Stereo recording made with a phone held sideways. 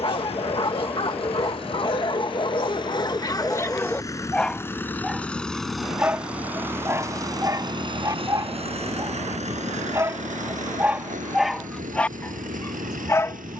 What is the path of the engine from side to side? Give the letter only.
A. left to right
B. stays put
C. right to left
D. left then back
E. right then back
A.